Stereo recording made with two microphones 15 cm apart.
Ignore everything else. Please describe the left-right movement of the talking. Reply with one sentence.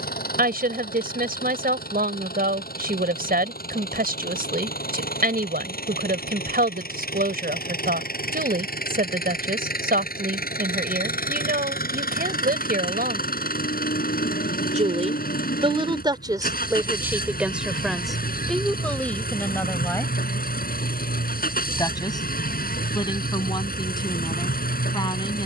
You can hear the talking move from right to left.